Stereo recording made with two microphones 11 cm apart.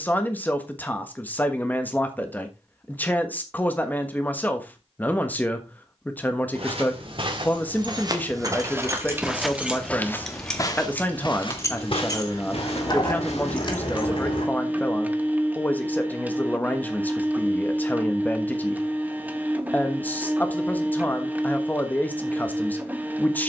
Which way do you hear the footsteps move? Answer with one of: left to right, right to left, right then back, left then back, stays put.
right to left.